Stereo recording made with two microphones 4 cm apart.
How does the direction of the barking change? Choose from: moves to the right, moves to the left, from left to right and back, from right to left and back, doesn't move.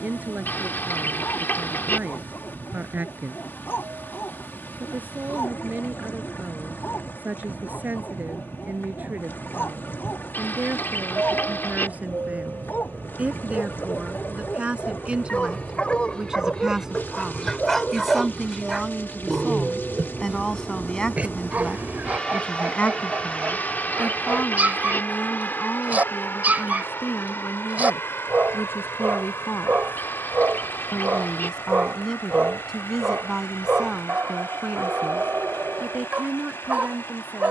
moves to the right.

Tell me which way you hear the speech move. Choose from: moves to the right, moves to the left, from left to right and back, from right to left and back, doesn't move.
from right to left and back.